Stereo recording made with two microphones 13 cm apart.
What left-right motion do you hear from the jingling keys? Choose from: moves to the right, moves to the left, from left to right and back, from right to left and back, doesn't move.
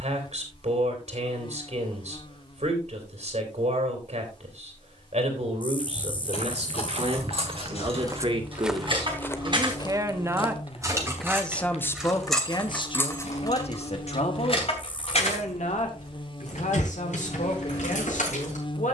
moves to the left.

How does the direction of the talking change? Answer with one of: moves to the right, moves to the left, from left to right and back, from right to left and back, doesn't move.
moves to the left.